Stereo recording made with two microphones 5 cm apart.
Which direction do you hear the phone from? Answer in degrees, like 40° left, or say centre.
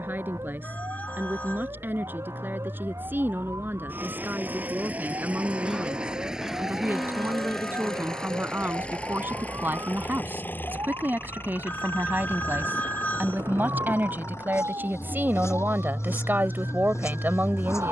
30° left.